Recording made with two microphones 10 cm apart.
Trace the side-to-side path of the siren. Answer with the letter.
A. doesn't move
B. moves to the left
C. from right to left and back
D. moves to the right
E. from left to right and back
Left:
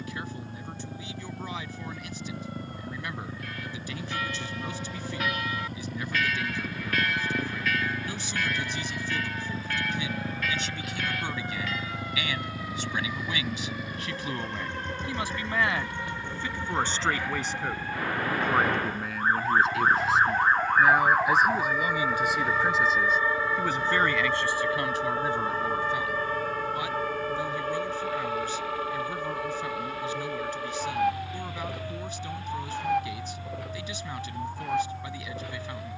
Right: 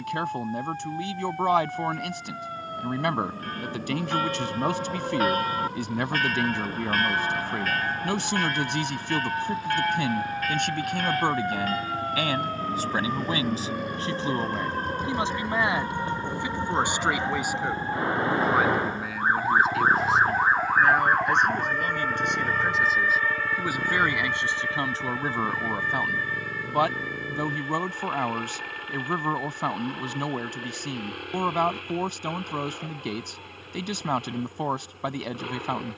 B.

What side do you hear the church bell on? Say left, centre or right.
right.